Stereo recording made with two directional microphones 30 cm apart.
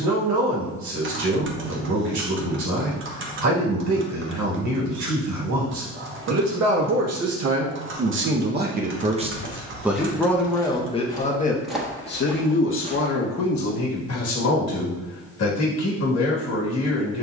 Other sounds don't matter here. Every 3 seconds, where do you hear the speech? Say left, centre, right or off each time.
right, right, right, centre, left, left.